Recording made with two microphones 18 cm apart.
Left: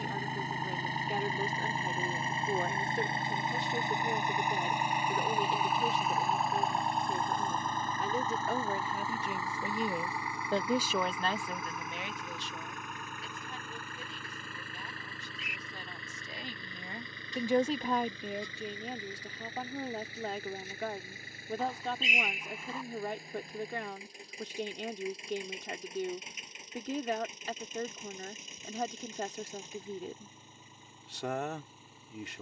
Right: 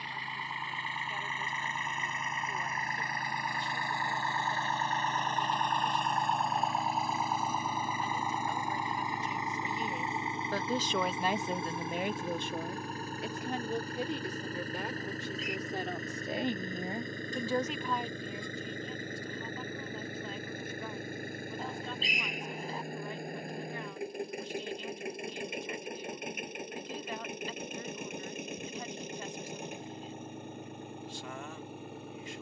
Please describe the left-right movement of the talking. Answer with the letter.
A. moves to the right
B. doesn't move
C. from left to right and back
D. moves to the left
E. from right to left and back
C.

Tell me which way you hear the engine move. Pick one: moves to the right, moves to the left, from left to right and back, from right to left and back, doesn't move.
moves to the right.